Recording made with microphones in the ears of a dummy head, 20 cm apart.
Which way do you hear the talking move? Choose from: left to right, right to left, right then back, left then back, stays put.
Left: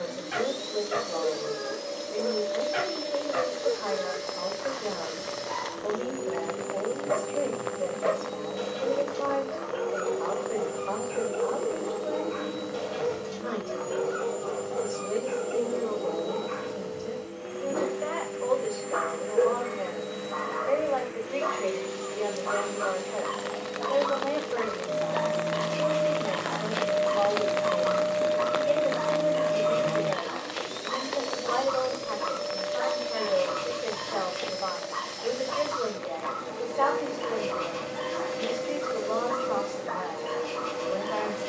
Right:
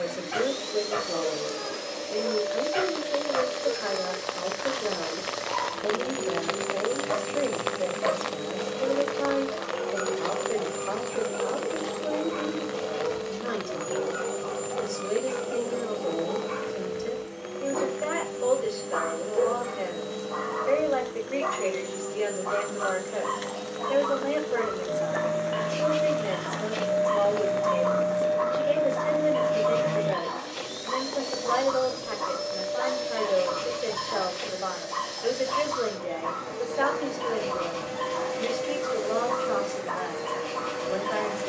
stays put.